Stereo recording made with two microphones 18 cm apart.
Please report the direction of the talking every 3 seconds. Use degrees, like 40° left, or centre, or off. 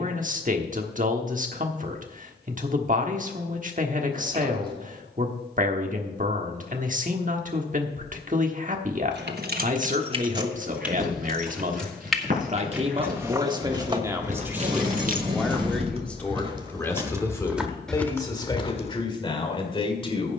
50° right, 50° right, 50° right, 50° right, 20° right, 10° left, 30° left.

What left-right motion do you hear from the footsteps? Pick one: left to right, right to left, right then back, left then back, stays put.
right to left.